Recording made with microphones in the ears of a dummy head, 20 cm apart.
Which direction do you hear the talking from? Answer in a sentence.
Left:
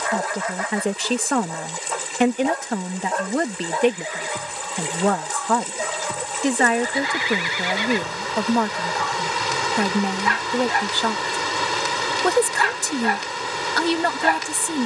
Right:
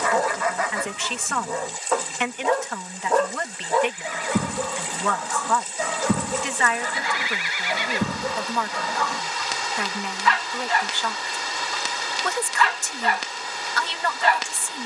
In this clip you hear the talking on the left.